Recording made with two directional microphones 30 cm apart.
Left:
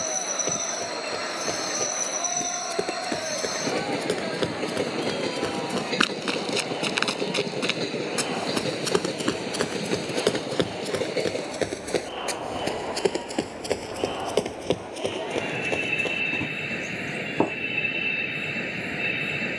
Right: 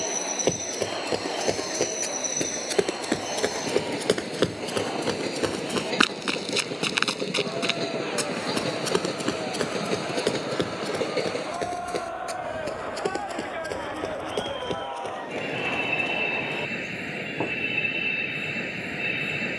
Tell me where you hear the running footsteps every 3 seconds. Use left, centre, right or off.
right, right, centre, left, left, left, off.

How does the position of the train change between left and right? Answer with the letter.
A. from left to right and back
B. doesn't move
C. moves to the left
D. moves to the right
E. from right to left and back
B.